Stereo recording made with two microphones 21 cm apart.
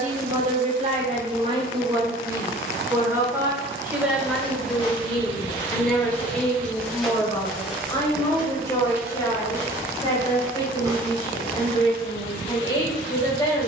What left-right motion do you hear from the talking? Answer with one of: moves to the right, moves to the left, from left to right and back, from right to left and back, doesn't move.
moves to the left.